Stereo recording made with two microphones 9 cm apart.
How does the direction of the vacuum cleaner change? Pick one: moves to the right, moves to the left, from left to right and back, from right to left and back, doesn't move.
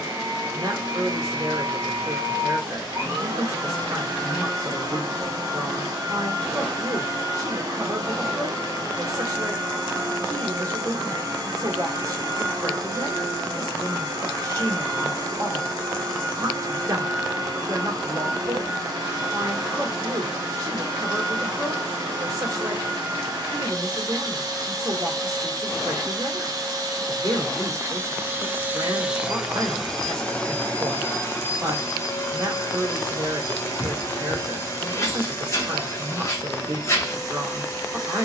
moves to the left.